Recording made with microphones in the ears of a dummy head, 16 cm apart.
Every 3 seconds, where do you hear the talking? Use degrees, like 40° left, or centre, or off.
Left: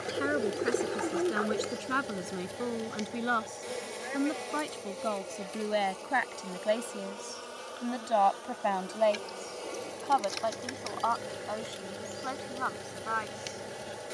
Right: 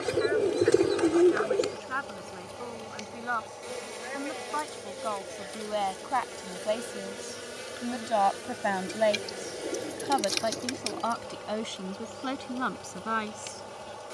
50° left, 30° left, 10° left, 30° right, 40° right.